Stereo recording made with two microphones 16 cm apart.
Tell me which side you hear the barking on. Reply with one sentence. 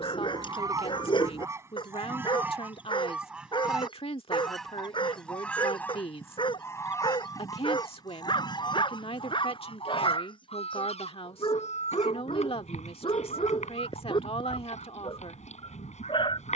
In this clip you hear the barking on the left.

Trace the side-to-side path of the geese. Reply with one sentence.
You can hear the geese go from the right side to the left.